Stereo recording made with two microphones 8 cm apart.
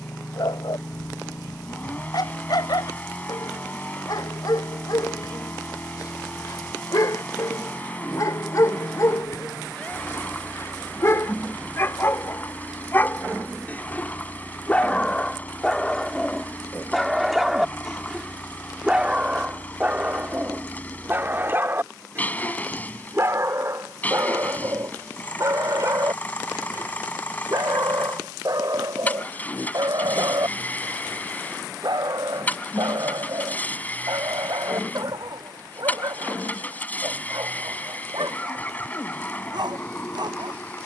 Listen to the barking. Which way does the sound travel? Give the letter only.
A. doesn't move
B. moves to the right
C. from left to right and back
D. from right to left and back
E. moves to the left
B.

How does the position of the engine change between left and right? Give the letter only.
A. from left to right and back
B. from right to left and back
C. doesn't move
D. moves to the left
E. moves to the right
C.